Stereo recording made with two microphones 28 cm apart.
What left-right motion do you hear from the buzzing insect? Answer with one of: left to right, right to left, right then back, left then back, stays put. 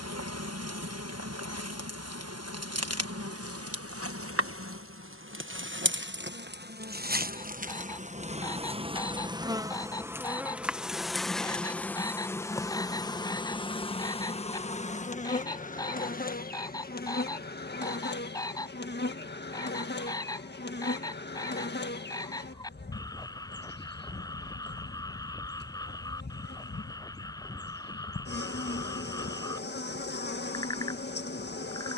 right to left.